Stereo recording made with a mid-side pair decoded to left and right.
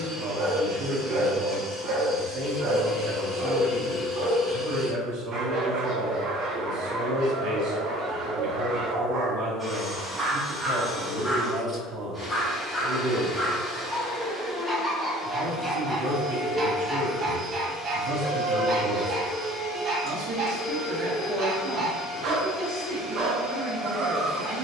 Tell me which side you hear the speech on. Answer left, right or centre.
right.